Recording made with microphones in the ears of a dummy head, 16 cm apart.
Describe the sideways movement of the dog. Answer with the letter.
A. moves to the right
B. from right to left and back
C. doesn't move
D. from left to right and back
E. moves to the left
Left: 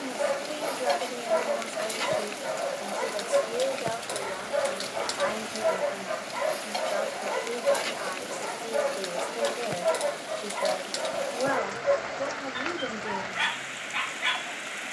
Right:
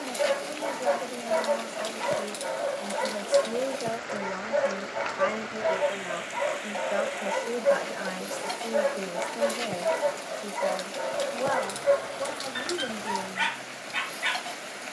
C.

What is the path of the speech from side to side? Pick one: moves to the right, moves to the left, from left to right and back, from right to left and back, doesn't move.
from left to right and back.